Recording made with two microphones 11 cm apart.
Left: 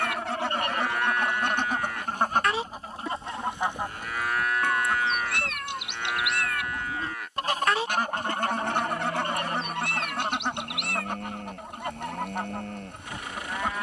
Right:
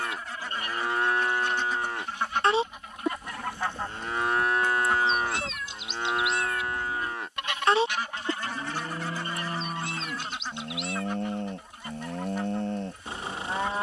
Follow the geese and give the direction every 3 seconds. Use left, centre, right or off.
left, centre, left, left, left.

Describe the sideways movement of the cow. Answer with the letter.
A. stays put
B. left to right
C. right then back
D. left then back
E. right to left
A.